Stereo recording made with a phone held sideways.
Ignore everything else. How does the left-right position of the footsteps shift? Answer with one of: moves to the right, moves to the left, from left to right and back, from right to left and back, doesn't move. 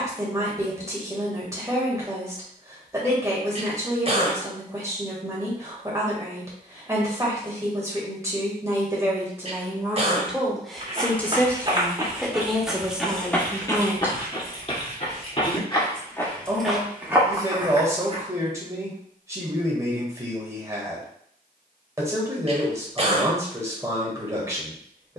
from right to left and back.